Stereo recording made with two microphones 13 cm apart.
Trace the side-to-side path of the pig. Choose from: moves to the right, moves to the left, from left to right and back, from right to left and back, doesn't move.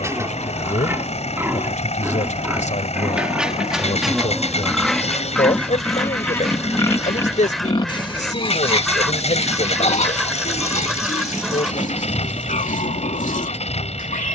moves to the left.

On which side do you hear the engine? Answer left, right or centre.
left.